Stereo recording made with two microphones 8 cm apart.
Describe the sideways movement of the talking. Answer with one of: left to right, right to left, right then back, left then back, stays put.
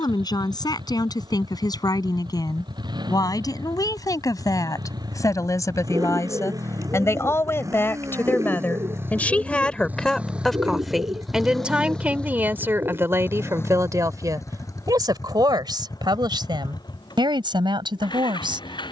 left to right.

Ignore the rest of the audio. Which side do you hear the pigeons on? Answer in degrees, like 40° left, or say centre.
40° right.